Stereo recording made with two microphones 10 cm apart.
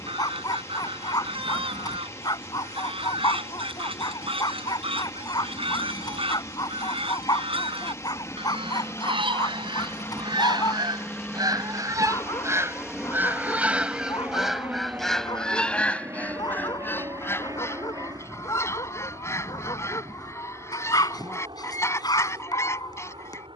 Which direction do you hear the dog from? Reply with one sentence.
In this clip you hear the dog on the left.